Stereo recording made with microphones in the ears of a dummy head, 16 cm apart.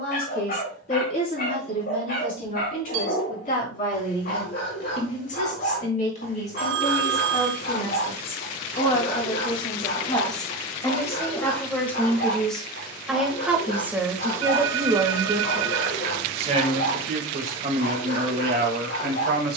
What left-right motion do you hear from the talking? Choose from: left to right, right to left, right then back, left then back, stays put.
left to right.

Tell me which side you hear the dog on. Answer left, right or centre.
left.